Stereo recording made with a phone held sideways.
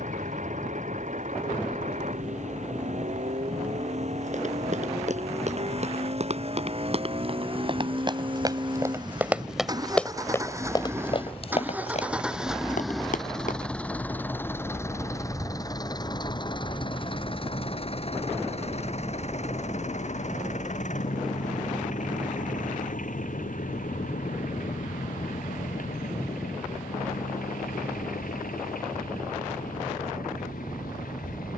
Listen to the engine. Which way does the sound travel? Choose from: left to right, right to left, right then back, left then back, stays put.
right to left.